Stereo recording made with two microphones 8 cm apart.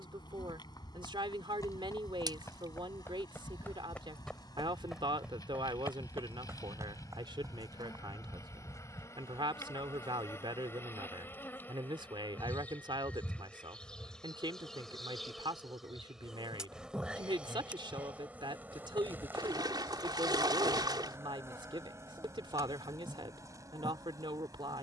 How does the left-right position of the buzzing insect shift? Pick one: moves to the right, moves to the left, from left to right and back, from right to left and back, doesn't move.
moves to the right.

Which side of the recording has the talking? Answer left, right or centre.
right.